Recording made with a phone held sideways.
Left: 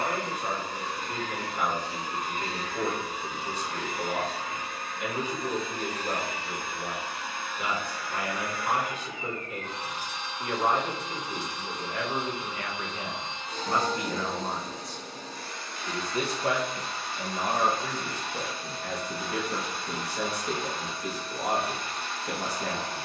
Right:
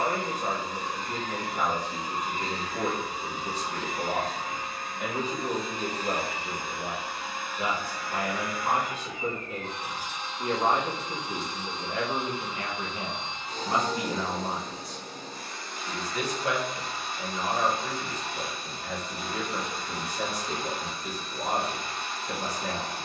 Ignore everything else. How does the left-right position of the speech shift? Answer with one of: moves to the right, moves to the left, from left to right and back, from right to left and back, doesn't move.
moves to the left.